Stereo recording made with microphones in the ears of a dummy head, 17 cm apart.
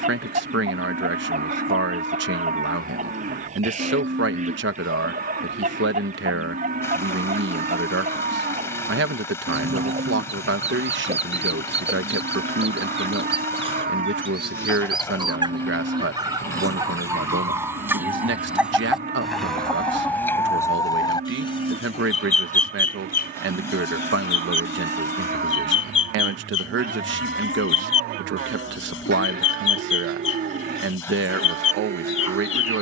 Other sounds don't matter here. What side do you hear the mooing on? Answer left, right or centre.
right.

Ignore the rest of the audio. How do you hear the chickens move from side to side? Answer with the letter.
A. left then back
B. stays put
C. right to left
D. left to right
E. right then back
C.